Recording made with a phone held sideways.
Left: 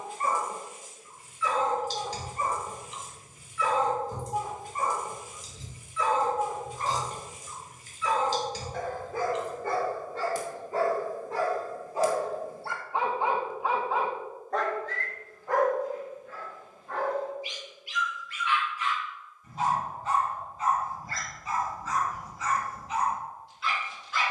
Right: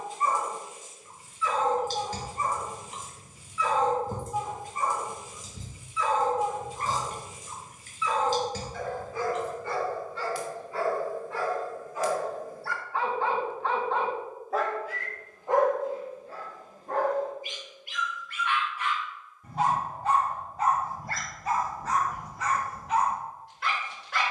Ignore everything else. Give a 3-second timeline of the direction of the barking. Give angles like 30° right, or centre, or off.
70° left, 60° left, 60° left, 40° left, 10° left, 40° right, 60° right, 80° right.